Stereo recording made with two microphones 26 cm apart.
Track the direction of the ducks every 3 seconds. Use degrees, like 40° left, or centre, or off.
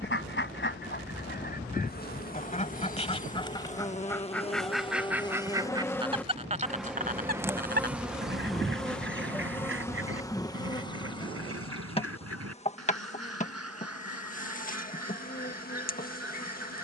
40° left, centre, 40° right, 60° right, 70° right, 70° right.